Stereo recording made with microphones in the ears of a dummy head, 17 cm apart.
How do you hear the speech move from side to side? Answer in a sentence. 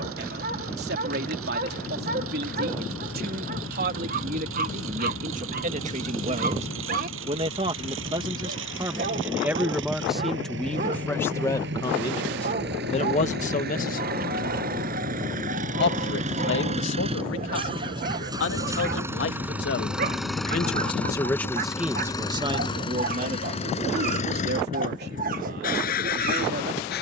In this clip you hear the speech move from right to left and back again.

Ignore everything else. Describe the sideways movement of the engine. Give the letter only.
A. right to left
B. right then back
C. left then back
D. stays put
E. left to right
A.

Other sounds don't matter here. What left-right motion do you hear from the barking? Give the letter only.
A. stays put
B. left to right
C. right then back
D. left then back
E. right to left
A.